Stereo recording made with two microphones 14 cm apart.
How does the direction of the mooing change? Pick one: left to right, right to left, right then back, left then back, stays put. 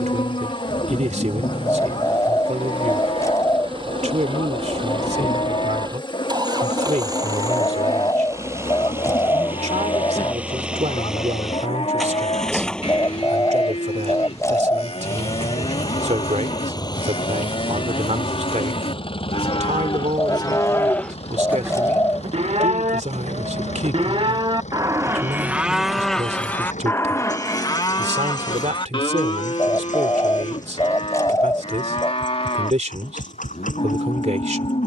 right then back.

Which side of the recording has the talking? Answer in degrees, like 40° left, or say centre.
60° right.